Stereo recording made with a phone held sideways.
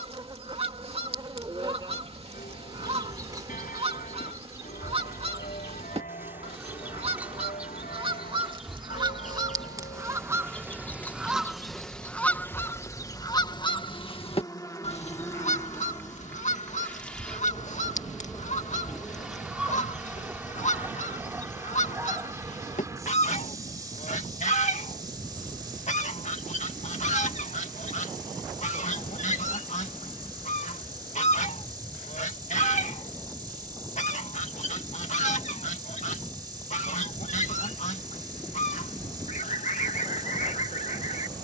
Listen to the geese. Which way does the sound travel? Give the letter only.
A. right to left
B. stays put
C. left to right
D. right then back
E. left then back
A.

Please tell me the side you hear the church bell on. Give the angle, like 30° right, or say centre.
70° left.